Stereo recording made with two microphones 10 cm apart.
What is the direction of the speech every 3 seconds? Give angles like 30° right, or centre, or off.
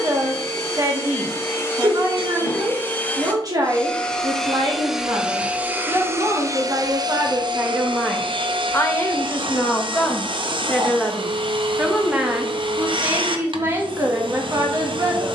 40° right, 40° right, 20° right, 10° left, 30° right.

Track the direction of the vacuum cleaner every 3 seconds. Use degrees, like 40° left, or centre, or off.
30° left, centre, 50° right, 60° right, 60° right.